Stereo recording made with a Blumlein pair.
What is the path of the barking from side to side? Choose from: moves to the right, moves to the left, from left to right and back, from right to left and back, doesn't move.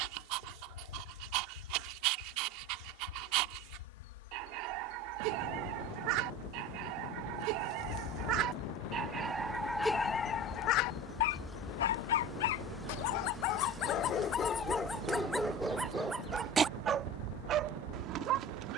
from right to left and back.